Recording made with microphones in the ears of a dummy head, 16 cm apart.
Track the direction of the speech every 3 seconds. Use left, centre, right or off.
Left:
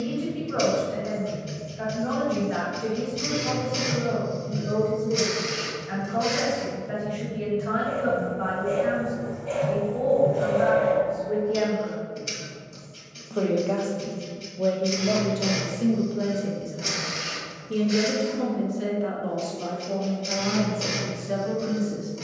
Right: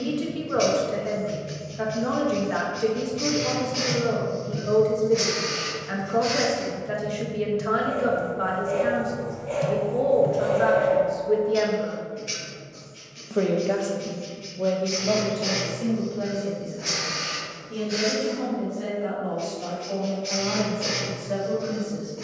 right, right, right, right, centre, left, left, left.